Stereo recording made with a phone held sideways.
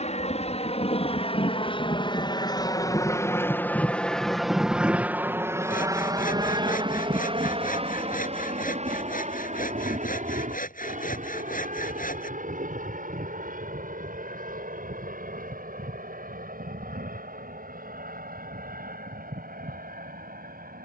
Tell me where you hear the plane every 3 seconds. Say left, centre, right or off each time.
left, centre, right, right, right, right, right.